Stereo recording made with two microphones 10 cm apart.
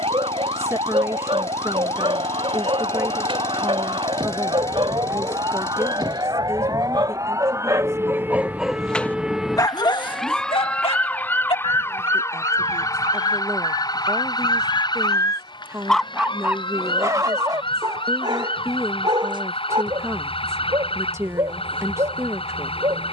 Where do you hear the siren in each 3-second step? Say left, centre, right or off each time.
right, right, right, centre, left, left, left, left.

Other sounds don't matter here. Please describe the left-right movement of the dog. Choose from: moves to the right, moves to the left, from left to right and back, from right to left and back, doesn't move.
from right to left and back.